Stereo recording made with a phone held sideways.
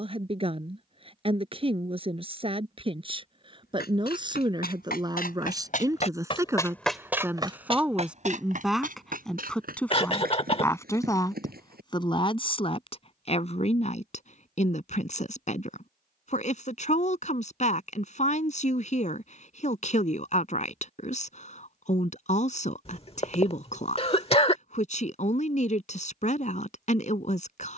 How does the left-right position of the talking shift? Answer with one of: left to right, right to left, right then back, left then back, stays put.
right to left.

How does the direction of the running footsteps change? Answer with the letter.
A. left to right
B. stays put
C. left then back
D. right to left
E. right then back
A.